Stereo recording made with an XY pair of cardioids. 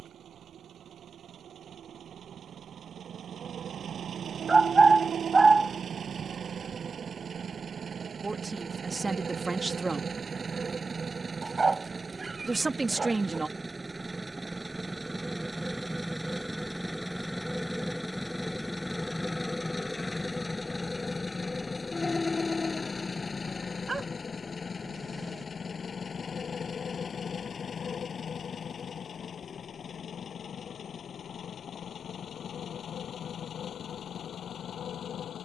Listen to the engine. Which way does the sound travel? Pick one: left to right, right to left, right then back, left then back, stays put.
right to left.